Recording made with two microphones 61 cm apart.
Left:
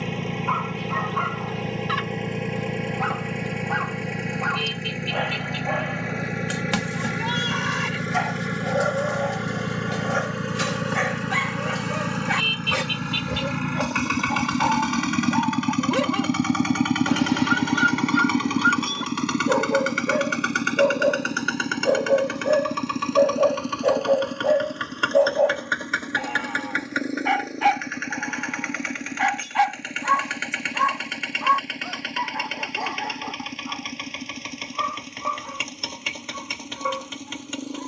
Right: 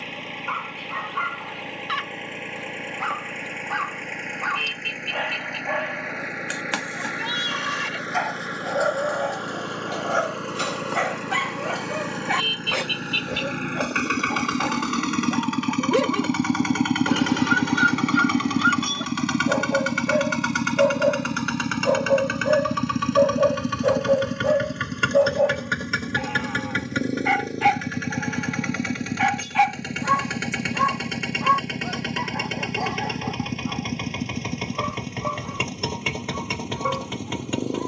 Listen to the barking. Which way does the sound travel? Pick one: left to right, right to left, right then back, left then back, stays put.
left to right.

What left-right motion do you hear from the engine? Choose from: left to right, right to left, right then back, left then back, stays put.
left to right.